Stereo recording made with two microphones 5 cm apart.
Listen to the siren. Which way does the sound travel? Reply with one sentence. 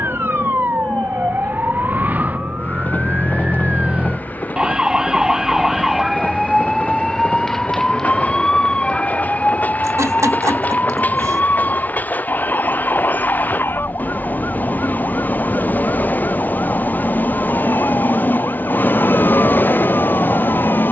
You can hear the siren move to the left.